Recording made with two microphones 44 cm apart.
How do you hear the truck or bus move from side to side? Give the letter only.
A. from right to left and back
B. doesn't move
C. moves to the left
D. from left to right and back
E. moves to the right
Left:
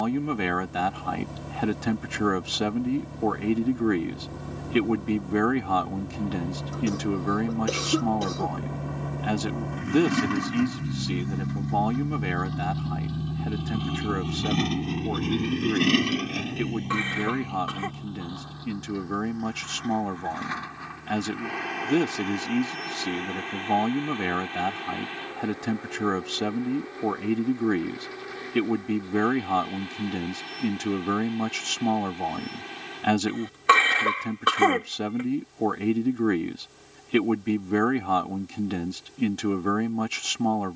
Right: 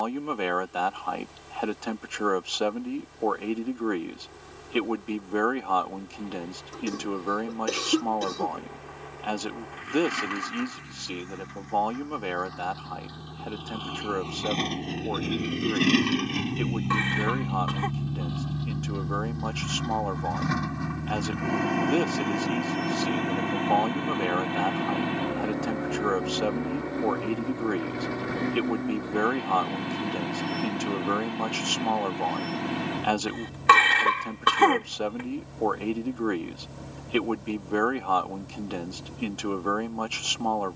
E.